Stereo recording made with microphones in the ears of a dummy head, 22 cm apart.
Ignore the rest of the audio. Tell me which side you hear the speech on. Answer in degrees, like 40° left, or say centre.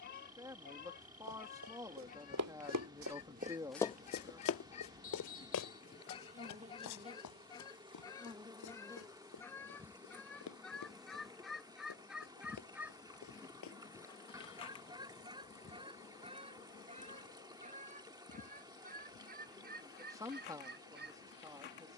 20° right.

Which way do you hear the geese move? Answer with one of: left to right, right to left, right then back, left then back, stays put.
left to right.